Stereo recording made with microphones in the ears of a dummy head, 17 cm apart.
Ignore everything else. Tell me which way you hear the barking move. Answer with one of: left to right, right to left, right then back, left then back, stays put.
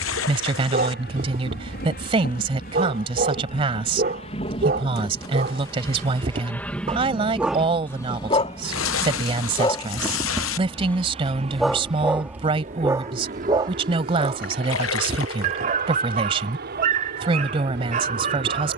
left then back.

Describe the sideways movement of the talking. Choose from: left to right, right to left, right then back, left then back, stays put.
stays put.